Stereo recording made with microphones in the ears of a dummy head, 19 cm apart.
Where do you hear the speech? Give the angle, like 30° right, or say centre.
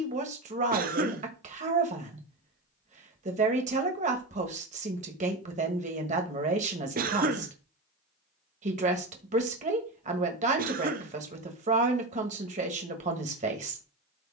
40° right.